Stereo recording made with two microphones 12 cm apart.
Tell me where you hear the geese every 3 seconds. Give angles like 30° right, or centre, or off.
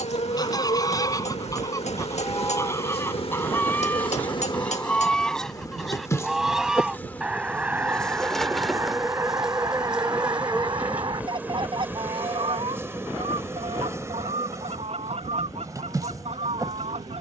30° left, 10° left, 10° right, 30° right, 50° right, 60° right.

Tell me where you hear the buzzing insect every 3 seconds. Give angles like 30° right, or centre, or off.
60° left, 40° left, 10° left, 10° right, 20° right, 30° right.